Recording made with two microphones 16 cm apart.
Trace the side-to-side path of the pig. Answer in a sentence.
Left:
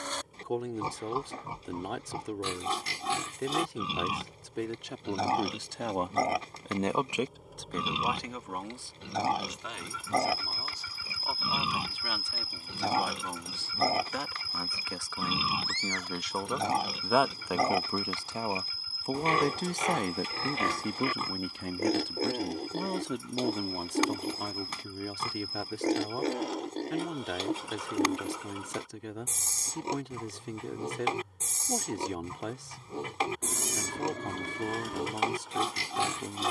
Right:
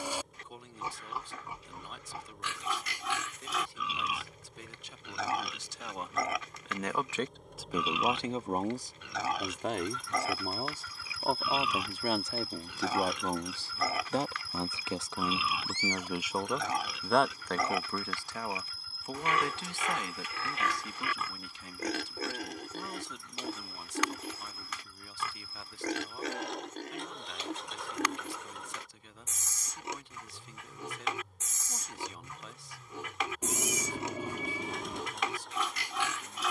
You can hear the pig stay in one place.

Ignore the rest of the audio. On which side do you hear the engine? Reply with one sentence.
You can hear the engine in the centre.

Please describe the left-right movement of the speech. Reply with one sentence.
You can hear the speech move from left to right and back again.